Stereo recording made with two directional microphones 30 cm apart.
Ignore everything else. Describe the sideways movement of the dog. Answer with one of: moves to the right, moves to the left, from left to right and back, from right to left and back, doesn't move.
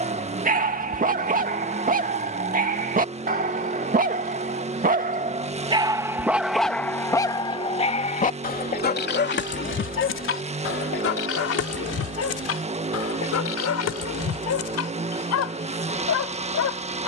moves to the left.